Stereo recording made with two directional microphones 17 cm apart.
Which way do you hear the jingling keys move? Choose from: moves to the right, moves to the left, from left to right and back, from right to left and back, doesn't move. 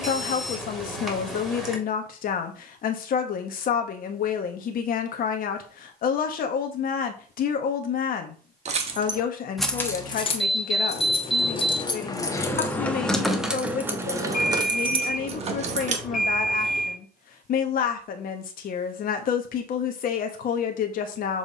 from right to left and back.